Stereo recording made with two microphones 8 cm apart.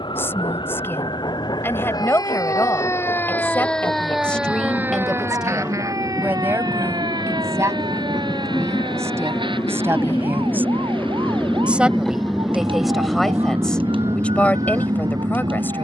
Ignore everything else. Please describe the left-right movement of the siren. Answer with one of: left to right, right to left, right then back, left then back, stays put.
left to right.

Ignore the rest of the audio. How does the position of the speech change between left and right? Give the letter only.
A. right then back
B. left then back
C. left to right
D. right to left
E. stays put
A.